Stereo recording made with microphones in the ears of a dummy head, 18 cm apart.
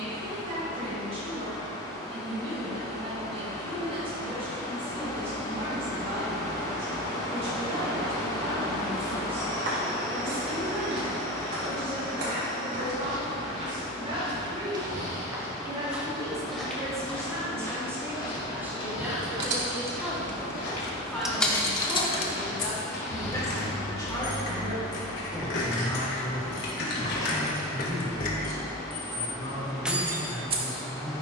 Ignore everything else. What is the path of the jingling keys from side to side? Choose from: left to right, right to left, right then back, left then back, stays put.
left then back.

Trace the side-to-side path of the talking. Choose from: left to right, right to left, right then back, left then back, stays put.
right to left.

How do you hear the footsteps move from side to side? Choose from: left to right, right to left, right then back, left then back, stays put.
right to left.